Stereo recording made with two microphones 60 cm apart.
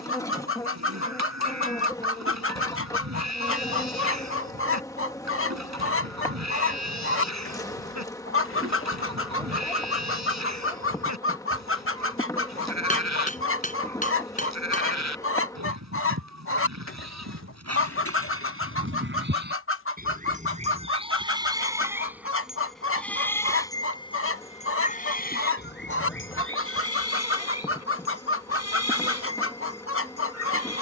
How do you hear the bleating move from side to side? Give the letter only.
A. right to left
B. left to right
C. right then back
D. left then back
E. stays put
A.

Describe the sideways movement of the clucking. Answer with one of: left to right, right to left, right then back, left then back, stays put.
stays put.